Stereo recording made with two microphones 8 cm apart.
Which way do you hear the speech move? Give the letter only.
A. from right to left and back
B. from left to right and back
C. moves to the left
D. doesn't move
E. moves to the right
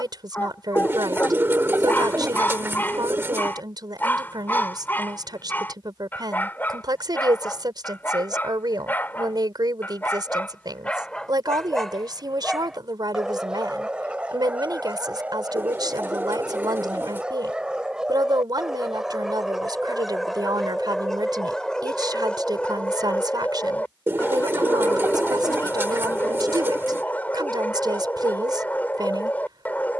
D.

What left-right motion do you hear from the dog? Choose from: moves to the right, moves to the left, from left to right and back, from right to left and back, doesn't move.
from left to right and back.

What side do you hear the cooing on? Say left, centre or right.
right.